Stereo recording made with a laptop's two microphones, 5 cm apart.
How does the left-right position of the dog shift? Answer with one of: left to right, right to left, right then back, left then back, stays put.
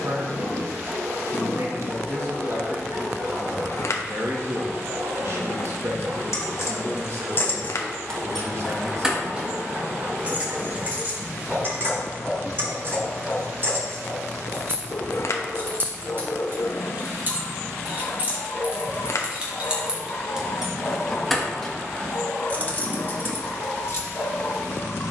right to left.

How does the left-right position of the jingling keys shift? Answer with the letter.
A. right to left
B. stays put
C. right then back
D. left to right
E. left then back
C.